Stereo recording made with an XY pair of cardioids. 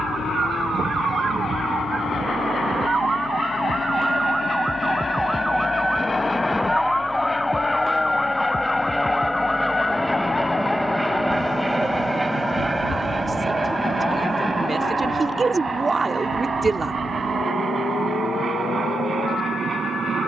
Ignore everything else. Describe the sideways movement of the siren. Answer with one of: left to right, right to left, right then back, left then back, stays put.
right to left.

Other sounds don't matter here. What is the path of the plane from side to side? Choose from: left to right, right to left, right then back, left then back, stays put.
left to right.